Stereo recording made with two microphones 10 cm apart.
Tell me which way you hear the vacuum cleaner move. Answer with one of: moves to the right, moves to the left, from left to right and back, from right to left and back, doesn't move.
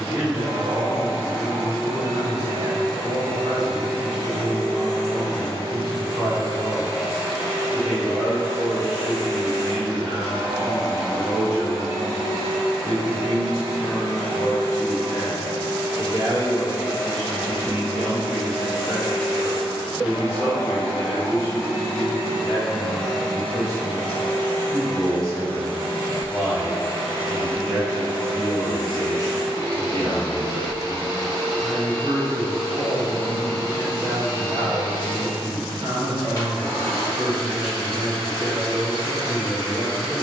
from left to right and back.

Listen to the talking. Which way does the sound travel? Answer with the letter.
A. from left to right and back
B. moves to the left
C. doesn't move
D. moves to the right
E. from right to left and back
E.